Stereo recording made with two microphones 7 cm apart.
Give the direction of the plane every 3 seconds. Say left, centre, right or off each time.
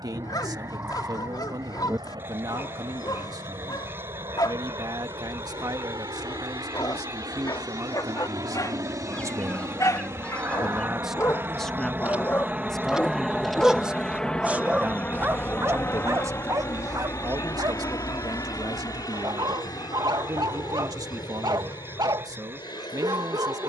right, right, right, right, centre, left, left, left.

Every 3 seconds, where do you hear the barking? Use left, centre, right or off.
left, left, left, left, centre, right, right, right.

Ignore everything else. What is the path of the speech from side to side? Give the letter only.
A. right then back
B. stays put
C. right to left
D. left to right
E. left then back
E.